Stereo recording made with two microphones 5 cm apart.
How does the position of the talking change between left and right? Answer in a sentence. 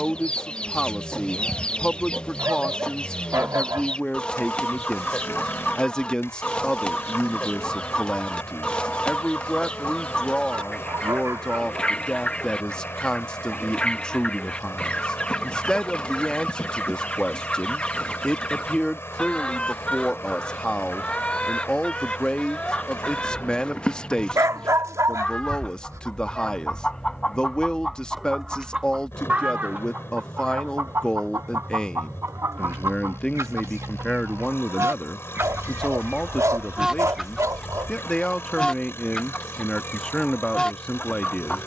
In this clip you hear the talking stay in one place.